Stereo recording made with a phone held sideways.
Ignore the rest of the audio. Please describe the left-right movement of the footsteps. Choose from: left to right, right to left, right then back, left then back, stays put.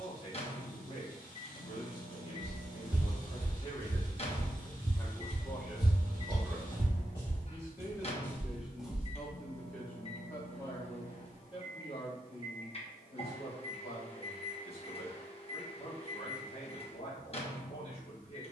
left then back.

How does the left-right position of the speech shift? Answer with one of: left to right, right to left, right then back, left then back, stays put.
right then back.